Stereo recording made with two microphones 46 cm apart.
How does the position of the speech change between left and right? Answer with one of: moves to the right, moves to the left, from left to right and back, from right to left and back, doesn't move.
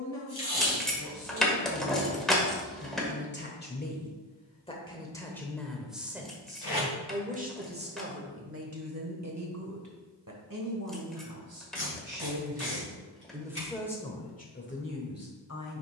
from left to right and back.